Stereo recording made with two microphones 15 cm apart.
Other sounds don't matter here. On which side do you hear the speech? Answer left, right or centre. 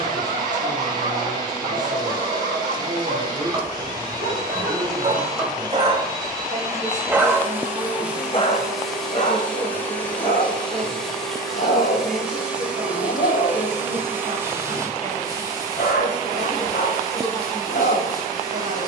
right.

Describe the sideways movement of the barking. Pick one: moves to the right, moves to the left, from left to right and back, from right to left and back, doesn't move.
moves to the left.